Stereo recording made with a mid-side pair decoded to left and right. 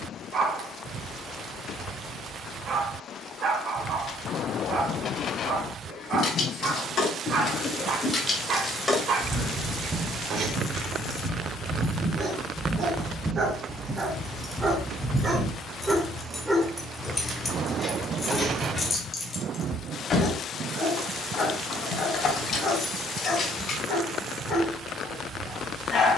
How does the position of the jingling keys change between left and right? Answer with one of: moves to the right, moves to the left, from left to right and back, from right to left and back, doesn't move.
from left to right and back.